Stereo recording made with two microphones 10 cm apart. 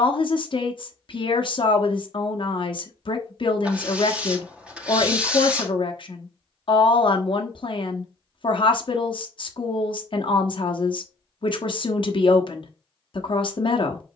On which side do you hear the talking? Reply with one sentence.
In this clip you hear the talking on the left.